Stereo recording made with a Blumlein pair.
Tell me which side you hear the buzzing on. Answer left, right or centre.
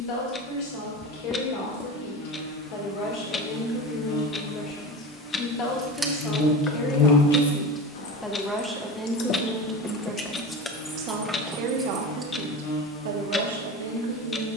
left.